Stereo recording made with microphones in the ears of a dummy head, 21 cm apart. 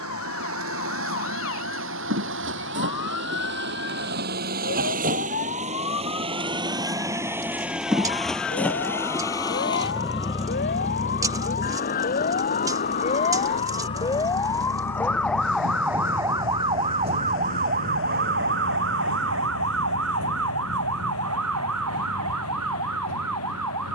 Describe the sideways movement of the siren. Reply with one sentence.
You can hear the siren move from left to right.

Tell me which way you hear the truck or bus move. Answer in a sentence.
In this clip you hear the truck or bus go from the right side to the left.